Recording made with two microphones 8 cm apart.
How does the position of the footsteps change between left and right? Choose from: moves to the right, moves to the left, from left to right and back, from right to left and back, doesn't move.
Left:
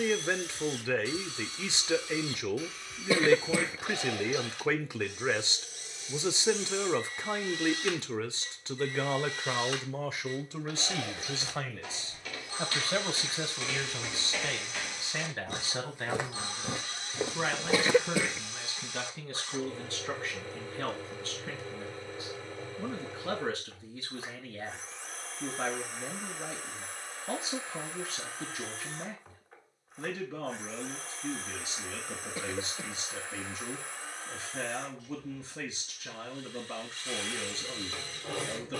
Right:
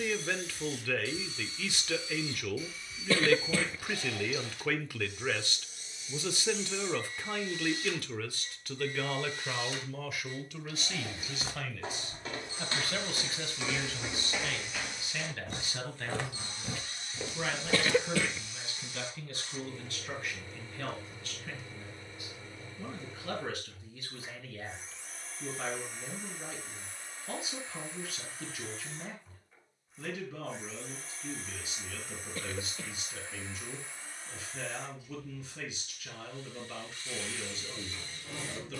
moves to the left.